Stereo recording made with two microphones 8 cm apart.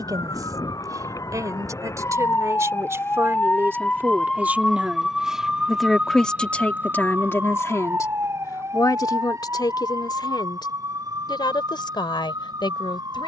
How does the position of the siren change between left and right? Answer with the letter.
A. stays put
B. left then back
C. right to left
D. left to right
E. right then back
D.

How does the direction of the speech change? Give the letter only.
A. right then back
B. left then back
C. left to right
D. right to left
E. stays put
D.